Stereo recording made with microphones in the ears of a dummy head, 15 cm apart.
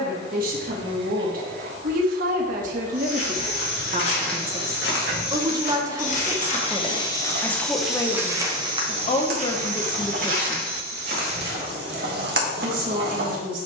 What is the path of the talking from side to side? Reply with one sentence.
You can hear the talking move from right to left and back again.